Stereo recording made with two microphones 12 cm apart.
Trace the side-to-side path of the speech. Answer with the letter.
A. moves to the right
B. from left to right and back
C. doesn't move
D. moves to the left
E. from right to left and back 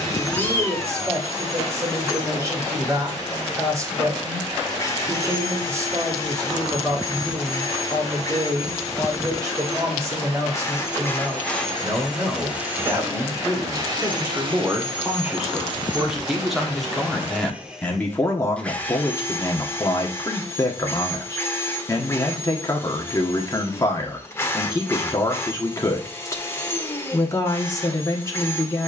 D.